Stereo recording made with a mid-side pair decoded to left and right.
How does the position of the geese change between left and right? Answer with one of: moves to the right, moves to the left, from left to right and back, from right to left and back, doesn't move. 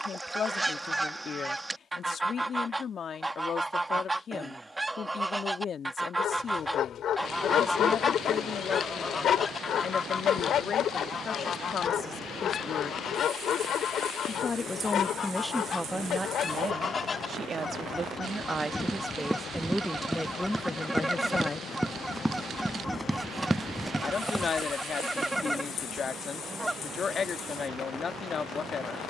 from right to left and back.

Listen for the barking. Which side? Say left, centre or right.
left.